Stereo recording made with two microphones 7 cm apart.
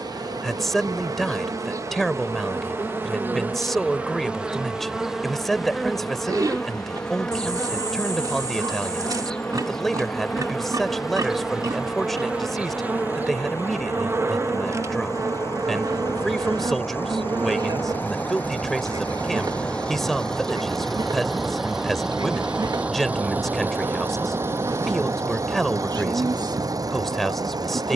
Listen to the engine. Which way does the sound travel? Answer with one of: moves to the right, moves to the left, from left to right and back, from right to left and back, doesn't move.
moves to the right.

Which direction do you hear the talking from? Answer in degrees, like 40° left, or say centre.
10° left.